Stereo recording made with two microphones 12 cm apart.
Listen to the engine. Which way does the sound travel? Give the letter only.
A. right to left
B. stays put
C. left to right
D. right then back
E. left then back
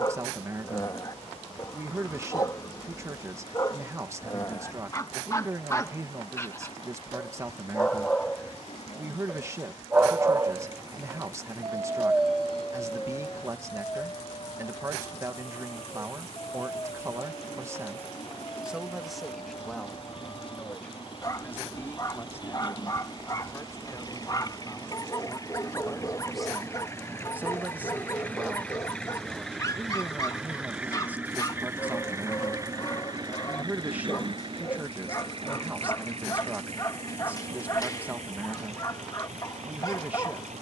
C.